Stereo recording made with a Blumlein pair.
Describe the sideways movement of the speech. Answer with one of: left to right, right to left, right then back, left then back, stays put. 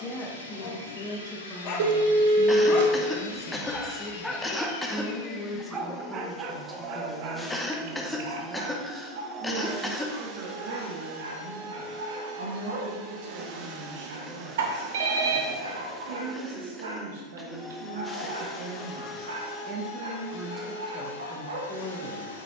right then back.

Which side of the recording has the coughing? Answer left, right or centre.
centre.